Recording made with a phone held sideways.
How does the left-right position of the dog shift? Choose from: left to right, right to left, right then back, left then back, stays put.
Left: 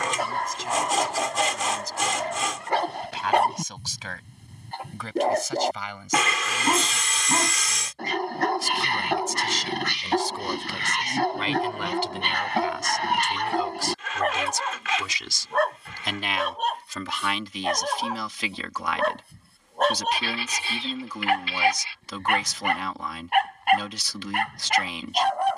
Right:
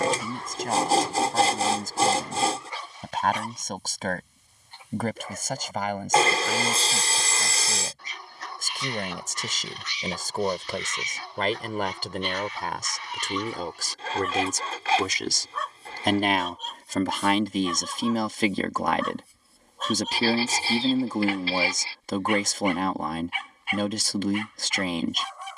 stays put.